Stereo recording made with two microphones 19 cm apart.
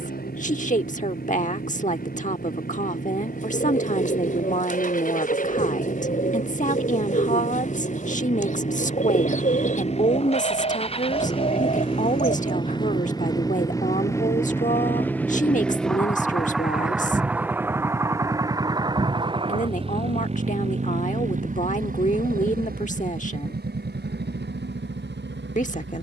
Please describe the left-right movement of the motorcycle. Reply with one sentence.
You can hear the motorcycle travel towards the right.